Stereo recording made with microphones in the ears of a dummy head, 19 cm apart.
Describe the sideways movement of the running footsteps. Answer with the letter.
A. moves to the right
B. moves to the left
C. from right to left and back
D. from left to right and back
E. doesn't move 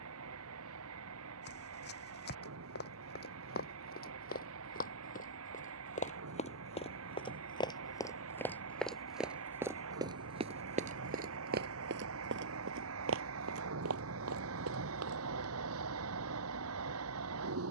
A.